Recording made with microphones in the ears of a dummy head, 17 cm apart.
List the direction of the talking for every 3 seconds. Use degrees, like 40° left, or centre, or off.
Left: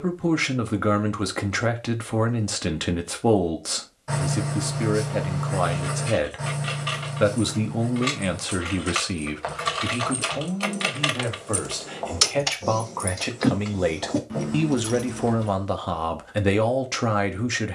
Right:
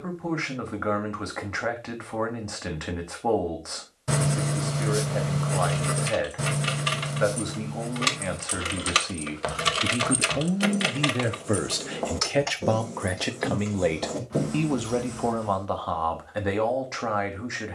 40° left, 40° left, 40° left, 10° right, centre, 30° left.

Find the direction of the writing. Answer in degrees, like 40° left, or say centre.
40° right.